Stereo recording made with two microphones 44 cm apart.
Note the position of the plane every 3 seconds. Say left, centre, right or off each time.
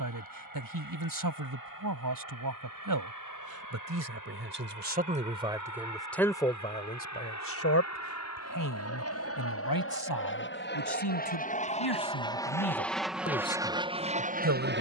left, left, left, left, centre.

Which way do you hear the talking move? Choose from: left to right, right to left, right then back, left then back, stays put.
left then back.